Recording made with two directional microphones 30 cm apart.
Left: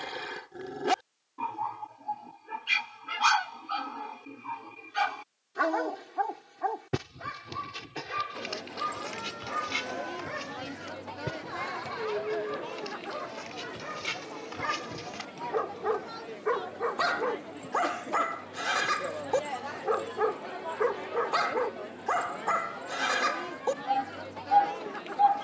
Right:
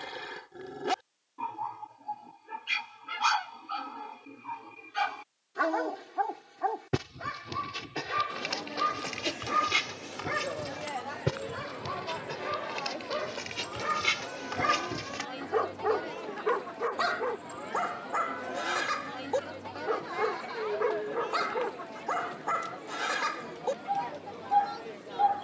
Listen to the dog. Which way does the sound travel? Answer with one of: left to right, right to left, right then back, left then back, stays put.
right then back.